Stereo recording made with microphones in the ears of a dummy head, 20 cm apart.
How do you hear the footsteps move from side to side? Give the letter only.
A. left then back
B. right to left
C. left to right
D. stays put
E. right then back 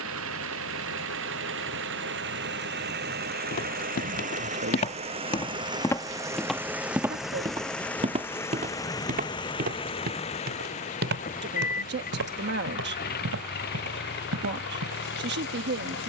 C.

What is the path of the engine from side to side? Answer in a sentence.
You can hear the engine go from the right side to the left.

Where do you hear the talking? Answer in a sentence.
In this clip you hear the talking on the right.